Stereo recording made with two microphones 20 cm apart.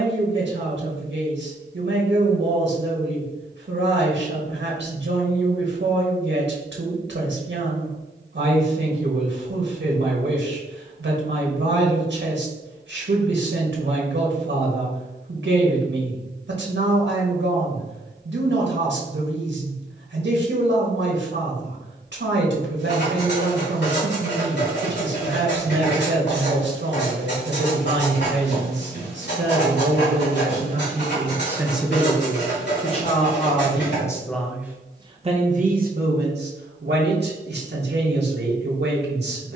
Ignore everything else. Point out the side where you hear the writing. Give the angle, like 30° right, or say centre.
60° left.